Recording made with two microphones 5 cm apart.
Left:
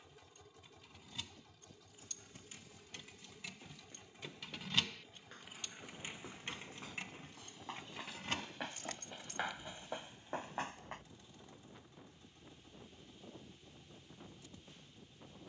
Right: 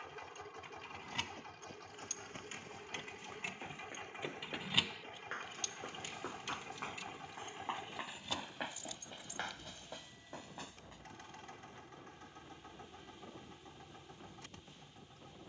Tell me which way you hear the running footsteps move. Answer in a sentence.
In this clip you hear the running footsteps move from right to left.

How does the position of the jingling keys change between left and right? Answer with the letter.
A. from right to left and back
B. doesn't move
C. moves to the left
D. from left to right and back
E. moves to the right
C.